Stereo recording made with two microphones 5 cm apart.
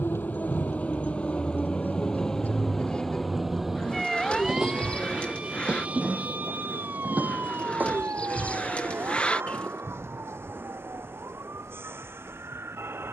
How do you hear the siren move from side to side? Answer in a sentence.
You can hear the siren move from left to right.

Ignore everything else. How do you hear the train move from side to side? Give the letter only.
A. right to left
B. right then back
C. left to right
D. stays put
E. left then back
C.